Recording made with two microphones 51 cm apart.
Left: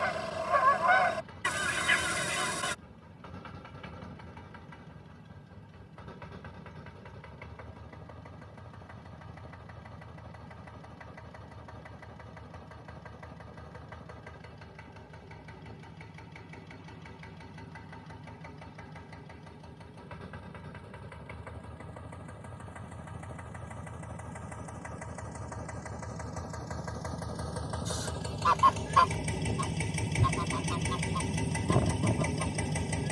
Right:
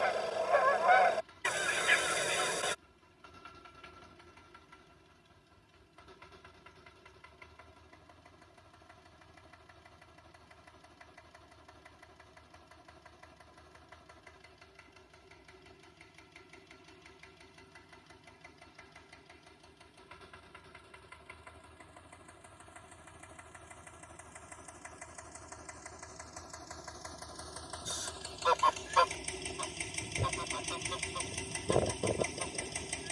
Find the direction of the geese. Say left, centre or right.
left.